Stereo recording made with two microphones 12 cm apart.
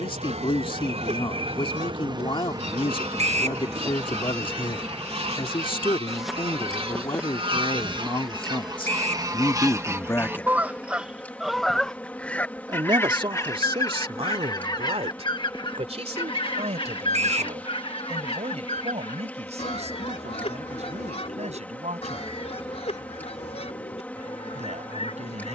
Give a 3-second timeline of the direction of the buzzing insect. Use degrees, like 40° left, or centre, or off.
50° right, 10° right, centre, 10° left, 10° left, 10° left, 10° left, 10° left, 10° left.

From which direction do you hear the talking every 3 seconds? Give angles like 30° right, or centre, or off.
50° left, 50° left, 50° left, 30° left, 50° right, 70° right, 70° right, 80° right, 80° right.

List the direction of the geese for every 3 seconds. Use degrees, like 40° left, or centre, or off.
70° right, 60° right, 50° right, 20° right, 30° left, 50° left, 60° left, 70° left, 70° left.